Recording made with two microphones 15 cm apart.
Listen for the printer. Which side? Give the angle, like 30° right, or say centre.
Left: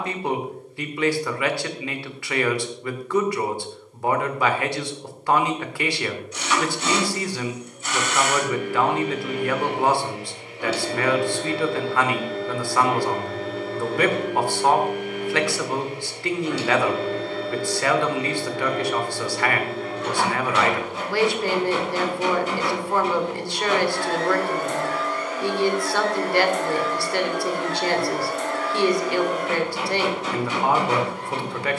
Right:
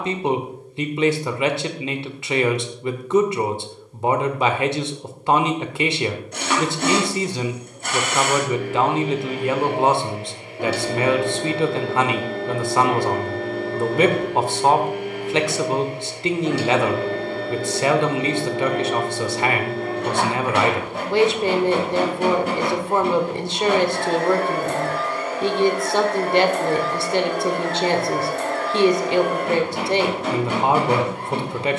60° right.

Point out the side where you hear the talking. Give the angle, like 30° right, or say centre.
20° right.